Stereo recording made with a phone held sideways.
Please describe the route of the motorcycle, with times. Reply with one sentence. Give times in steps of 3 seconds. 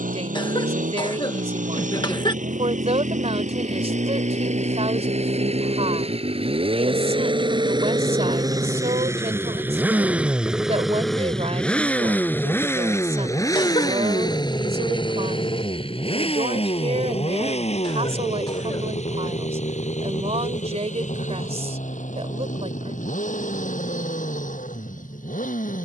You can hear the motorcycle on the right from 0 s, in the centre from 9 s and on the left from 12 s.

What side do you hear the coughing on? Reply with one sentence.
You can hear the coughing on the left.